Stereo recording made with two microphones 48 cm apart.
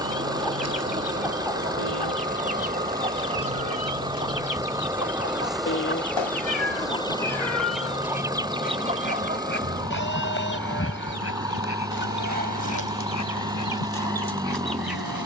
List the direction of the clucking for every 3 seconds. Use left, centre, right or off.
left, left, centre, right, right.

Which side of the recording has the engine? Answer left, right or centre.
centre.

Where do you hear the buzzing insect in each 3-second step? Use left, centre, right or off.
right, centre, centre, left, left.